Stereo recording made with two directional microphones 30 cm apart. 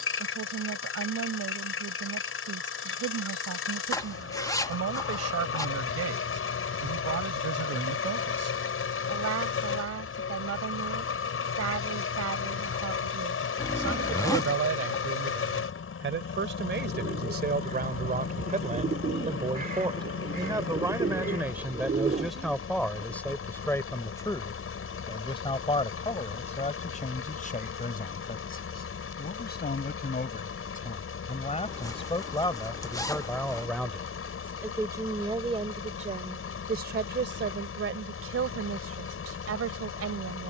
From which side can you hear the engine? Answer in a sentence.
You can hear the engine on the left.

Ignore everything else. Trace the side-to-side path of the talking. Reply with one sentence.
You can hear the talking go left and come back.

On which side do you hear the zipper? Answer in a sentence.
You can hear the zipper in the centre.